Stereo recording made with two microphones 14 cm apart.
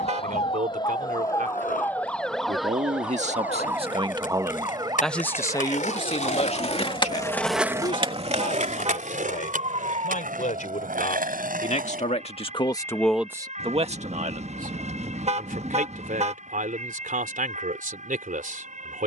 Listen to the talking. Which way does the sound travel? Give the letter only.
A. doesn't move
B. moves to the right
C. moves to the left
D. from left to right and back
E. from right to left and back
E.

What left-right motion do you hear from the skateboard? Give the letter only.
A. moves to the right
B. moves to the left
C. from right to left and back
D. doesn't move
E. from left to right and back
A.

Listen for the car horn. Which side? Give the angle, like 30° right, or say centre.
50° right.